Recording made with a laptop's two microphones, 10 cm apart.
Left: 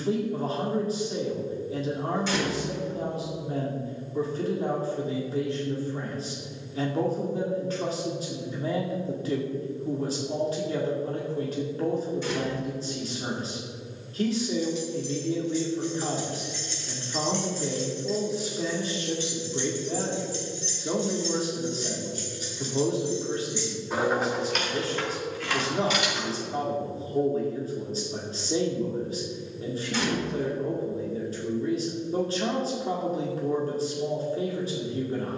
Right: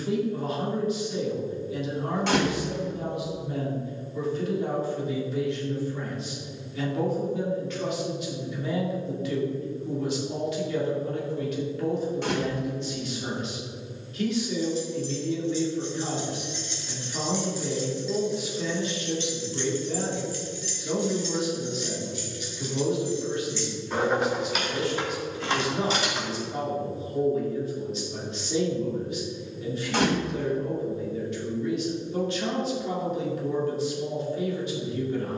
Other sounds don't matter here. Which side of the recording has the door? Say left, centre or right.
right.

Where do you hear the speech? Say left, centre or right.
left.